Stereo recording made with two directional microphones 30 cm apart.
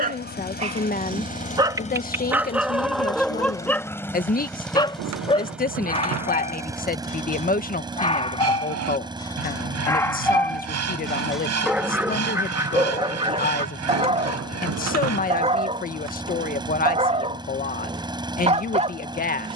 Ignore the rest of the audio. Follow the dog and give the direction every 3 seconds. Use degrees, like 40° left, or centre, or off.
10° right, 10° left, 20° left, centre, 10° right, 20° right, 20° right.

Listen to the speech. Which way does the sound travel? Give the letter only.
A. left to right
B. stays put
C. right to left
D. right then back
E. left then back
B.